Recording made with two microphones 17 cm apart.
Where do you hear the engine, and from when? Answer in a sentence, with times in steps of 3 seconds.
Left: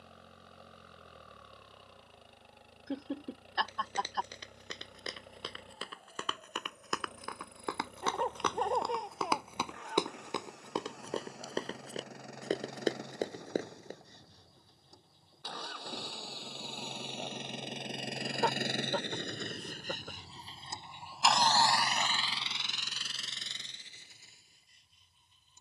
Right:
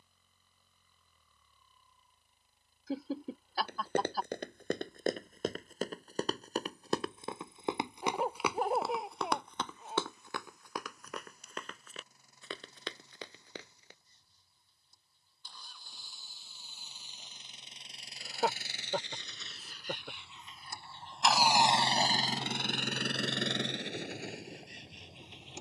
You can hear the engine on the left from 0 s and on the right from 21 s.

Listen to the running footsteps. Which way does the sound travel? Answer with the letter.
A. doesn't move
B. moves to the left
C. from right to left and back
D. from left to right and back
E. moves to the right
B.